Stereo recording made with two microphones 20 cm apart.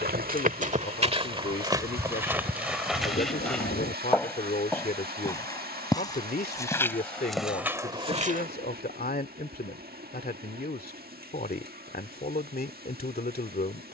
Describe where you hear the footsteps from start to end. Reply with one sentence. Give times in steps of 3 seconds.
In this clip you hear the footsteps on the right from 0 s, in the centre from 3 s and not at all from 9 s.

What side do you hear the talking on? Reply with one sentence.
You can hear the talking on the left.